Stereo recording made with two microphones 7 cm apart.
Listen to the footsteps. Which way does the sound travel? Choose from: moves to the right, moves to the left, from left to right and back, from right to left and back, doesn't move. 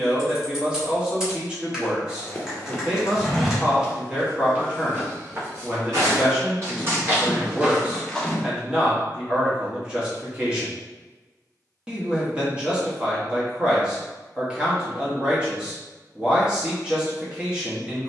from left to right and back.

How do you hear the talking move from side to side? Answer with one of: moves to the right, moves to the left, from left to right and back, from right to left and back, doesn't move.
doesn't move.